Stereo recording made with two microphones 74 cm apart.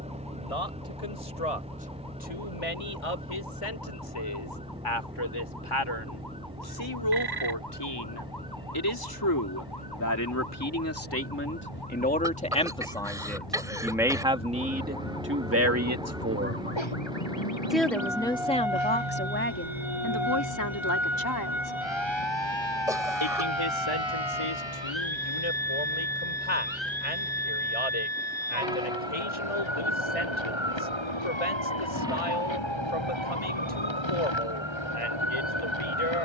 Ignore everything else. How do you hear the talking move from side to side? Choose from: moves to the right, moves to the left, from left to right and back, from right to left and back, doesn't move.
from left to right and back.